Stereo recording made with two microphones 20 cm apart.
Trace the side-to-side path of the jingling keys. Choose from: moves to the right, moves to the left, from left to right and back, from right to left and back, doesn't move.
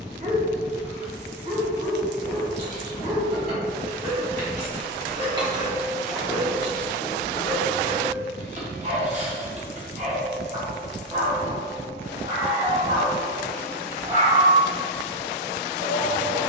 moves to the left.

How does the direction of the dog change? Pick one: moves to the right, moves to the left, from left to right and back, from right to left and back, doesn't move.
doesn't move.